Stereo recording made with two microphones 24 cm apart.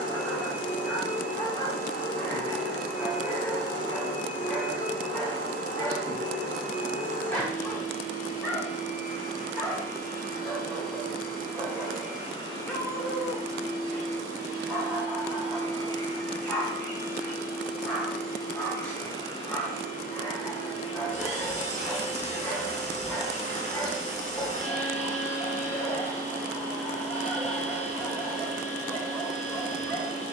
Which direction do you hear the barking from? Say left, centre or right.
centre.